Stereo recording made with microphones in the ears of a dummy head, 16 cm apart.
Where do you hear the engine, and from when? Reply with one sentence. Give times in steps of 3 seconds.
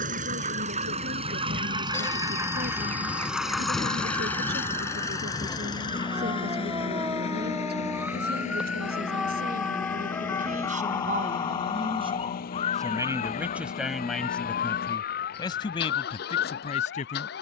You can hear the engine on the right from 0 s, in the centre from 3 s and on the left from 6 s.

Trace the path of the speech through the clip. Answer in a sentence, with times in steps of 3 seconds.
In this clip you hear the speech on the right from 0 s, in the centre from 12 s and on the left from 15 s.